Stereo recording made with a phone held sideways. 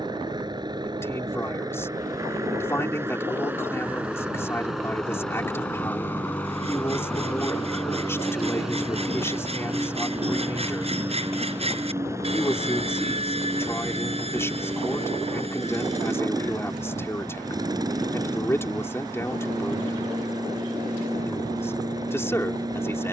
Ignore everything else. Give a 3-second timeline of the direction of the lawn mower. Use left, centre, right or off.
right, centre, centre, centre, right, right, right, right.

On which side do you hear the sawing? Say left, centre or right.
right.